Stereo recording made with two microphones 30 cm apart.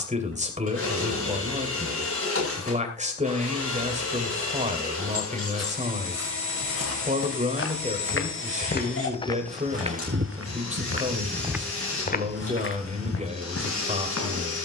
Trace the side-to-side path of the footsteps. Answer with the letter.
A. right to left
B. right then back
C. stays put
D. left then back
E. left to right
B.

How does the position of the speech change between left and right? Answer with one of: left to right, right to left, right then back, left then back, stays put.
stays put.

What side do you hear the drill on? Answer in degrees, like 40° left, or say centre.
50° left.